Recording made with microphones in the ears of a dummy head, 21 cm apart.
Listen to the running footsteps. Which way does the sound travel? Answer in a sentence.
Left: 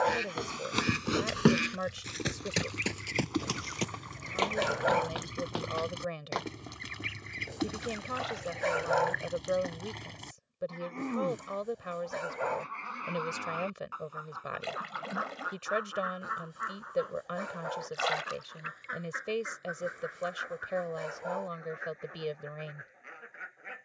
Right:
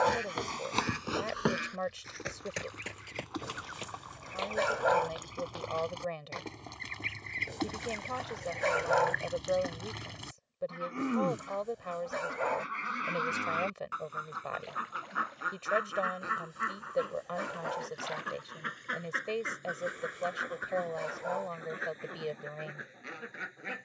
In this clip you hear the running footsteps move to the left.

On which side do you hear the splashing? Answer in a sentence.
In this clip you hear the splashing on the left.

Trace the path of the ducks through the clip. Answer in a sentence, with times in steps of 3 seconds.
In this clip you hear the ducks on the left from 0 s, in the centre from 6 s and on the right from 12 s.